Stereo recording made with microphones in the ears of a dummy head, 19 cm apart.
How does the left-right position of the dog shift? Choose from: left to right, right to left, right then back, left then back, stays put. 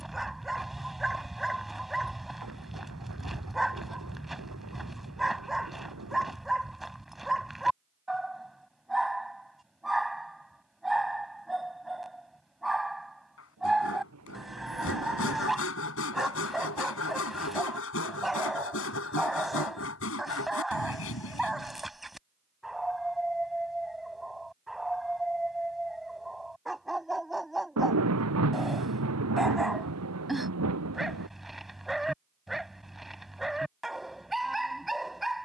stays put.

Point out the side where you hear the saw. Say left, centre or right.
left.